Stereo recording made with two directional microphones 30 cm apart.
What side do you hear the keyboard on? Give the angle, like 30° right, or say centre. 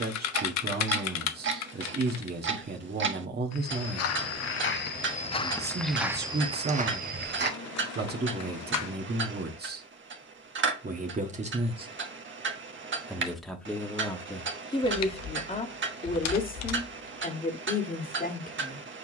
60° left.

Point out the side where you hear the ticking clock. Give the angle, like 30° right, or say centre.
40° right.